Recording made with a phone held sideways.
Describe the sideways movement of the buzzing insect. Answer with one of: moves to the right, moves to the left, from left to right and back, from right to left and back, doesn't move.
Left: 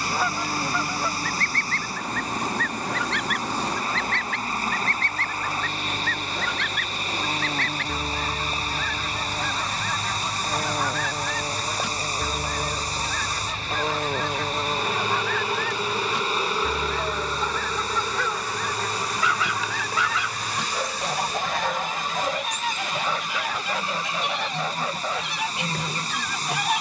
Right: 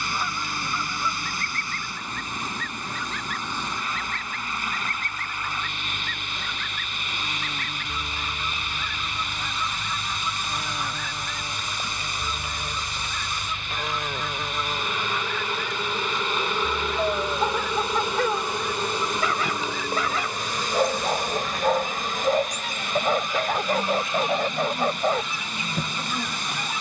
moves to the right.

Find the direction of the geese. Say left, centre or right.
left.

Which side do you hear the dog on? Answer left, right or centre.
right.